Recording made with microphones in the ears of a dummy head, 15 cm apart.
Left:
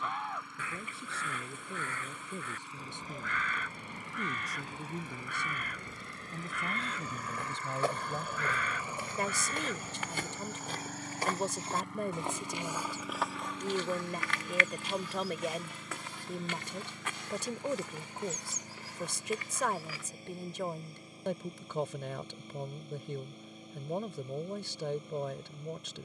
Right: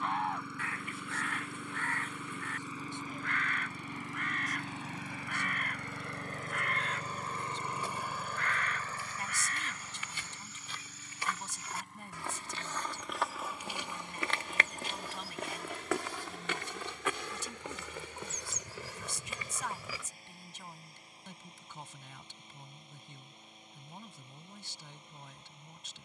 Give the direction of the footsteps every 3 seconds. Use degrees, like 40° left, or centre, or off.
off, off, 50° left, 40° left, 10° right, 60° right, 80° right, off, off.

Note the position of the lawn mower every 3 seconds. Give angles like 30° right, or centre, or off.
80° right, 60° right, 20° right, 40° left, 60° left, 70° left, 70° left, 70° left, 70° left.